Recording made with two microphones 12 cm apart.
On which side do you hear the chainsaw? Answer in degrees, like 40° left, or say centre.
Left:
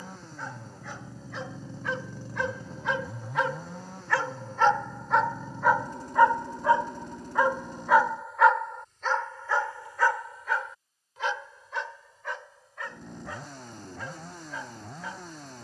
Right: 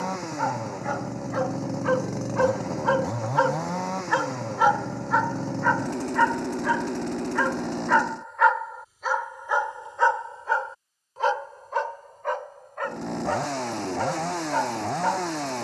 90° right.